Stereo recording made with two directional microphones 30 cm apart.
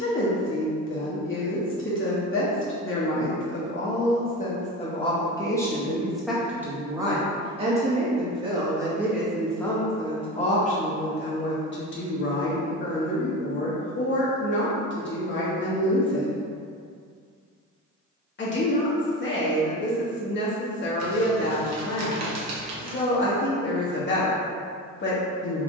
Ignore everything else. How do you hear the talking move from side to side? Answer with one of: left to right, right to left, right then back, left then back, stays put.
right then back.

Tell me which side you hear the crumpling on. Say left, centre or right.
right.